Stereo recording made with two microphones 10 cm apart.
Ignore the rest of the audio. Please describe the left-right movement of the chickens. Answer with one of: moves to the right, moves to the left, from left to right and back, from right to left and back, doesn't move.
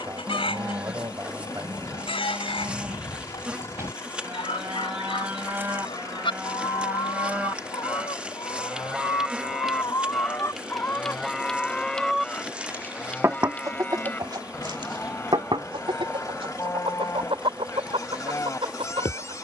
moves to the right.